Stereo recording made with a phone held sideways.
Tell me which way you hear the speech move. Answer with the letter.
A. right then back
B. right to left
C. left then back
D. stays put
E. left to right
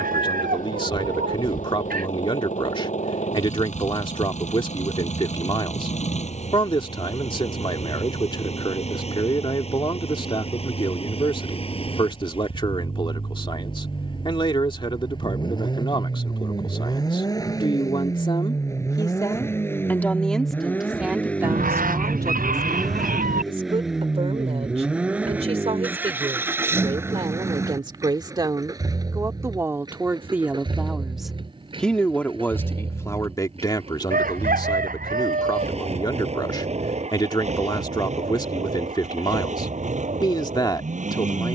A.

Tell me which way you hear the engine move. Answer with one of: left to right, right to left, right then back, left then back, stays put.
left to right.